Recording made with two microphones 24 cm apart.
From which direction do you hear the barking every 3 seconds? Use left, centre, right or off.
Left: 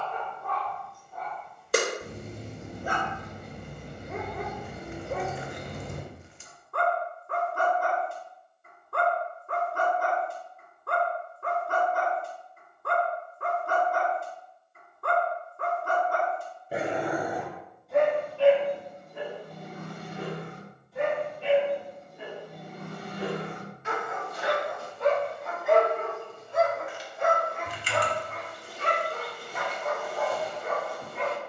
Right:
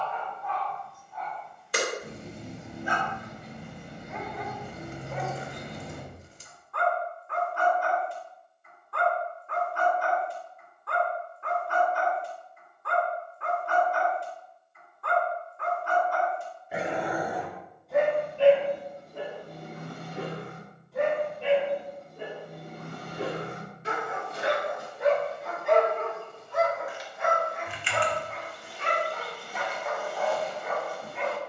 left, left, left, left, left, left, right, right, centre, left, left.